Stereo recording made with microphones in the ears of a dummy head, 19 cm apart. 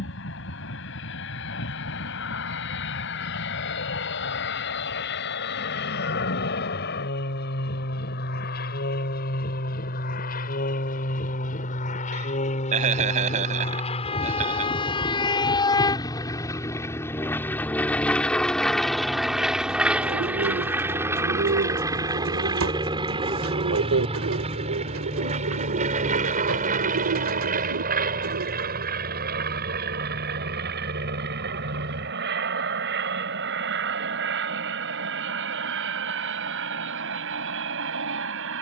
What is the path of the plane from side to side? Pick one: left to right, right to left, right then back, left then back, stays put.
left to right.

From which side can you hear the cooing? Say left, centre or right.
right.